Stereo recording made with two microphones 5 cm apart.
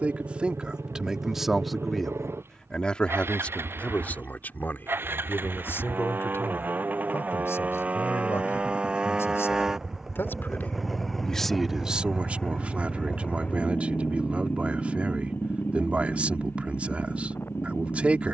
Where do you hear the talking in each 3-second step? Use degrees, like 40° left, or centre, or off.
centre, 40° left, 60° left, 30° left, 30° right, 30° right.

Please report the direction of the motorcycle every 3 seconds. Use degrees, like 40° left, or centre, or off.
60° right, 50° right, 30° right, centre, 30° left, 50° left.